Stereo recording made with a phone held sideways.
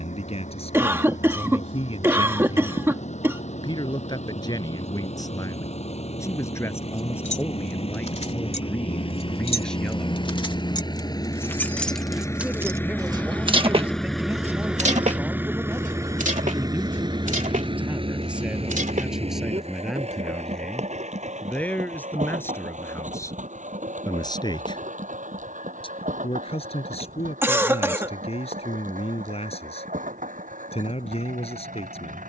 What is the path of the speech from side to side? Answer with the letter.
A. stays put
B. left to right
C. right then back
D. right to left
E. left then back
C.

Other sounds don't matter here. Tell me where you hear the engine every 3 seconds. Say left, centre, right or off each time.
left, left, left, left, centre, right, right, right, right, right, right.